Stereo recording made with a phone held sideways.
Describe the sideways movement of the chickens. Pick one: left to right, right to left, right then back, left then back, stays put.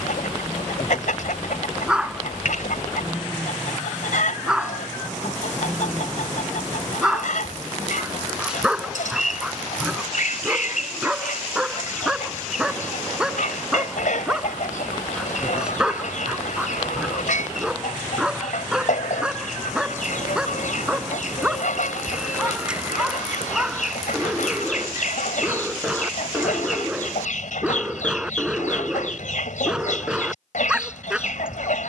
stays put.